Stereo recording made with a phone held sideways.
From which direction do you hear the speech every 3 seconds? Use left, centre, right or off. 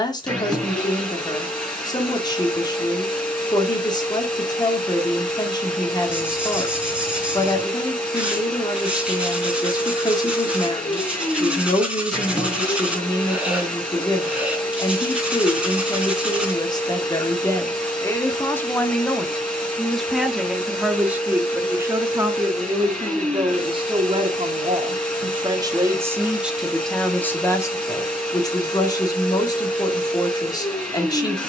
left, left, left, left, left, left, centre, right, right, left, left.